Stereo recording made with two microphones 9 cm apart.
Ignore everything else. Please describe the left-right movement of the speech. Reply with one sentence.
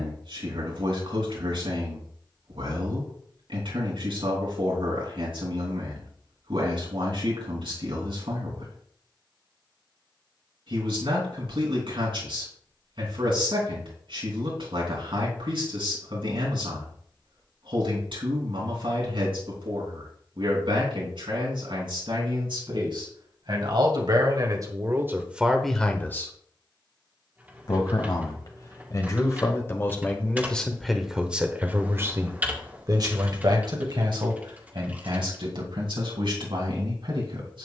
In this clip you hear the speech go left and come back.